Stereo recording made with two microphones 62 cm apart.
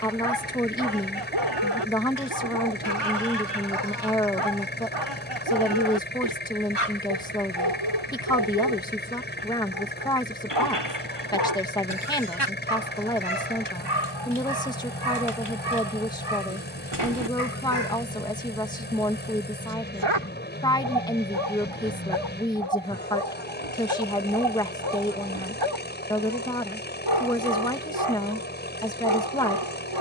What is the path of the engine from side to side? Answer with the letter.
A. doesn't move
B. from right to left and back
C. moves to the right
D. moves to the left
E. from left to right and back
A.